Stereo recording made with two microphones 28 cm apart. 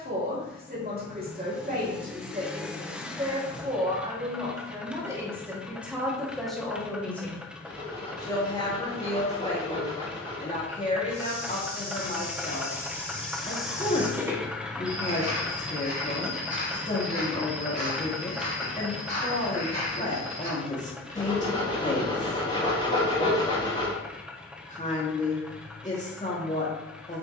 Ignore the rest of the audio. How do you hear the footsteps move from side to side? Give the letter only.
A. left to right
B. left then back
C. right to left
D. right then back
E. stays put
A.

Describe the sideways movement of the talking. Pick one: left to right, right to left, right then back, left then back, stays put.
right to left.